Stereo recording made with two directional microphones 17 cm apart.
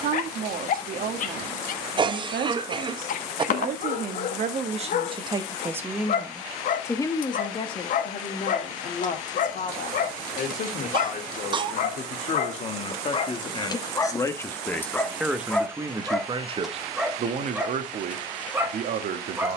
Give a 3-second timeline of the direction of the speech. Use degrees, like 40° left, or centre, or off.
60° right, 40° right, 30° left, 50° left, 30° left, 30° right, 60° right.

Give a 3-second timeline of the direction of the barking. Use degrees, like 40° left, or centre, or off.
50° left, 50° left, 50° left, 50° left, 30° left, centre, 10° right.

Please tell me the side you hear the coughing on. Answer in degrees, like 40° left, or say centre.
30° right.